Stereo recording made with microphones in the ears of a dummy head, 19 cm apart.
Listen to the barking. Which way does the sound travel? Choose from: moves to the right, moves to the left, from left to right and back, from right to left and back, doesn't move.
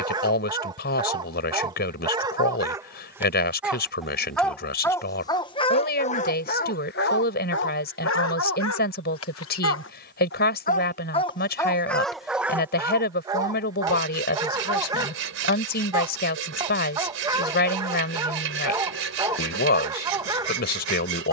from right to left and back.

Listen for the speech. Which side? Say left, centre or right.
left.